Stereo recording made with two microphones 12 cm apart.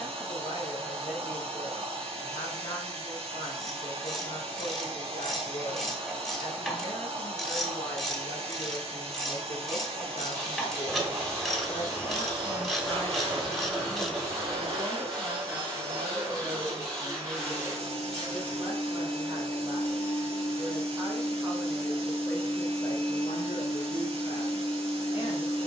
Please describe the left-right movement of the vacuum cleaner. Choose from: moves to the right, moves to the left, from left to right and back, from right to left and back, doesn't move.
doesn't move.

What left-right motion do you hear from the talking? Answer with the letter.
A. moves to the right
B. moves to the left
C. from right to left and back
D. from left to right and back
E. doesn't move
D.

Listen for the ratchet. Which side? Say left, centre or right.
centre.